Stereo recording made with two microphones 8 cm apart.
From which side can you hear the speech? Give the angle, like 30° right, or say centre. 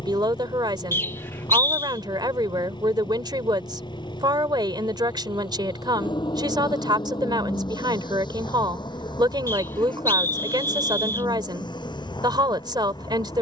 60° right.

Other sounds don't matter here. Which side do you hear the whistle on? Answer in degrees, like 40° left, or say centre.
30° left.